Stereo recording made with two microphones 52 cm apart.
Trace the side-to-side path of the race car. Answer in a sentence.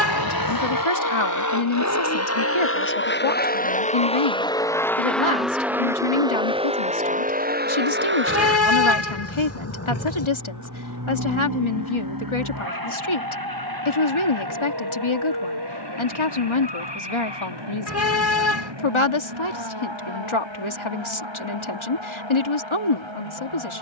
You can hear the race car travel towards the right.